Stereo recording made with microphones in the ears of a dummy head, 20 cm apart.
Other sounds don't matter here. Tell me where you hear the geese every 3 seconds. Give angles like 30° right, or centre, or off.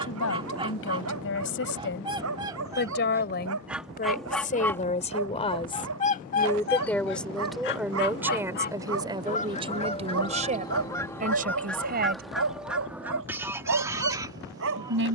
20° right, centre, 40° left, 20° left, 10° right.